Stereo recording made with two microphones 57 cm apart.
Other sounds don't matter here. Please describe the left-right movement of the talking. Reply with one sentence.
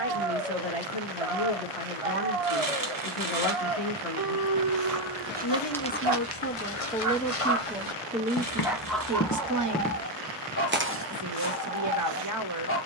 You can hear the talking move to the right.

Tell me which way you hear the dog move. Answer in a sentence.
In this clip you hear the dog go from the right side to the left.